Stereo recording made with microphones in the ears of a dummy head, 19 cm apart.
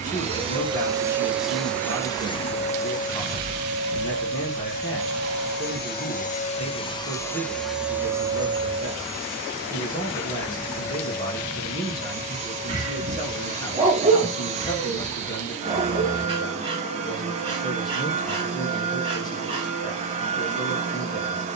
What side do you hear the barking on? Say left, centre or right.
right.